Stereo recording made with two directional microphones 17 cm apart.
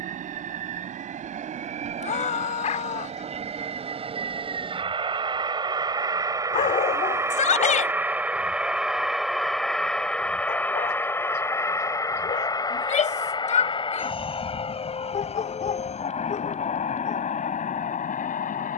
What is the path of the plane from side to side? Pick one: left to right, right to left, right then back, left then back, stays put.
right to left.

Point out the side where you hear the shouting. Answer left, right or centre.
left.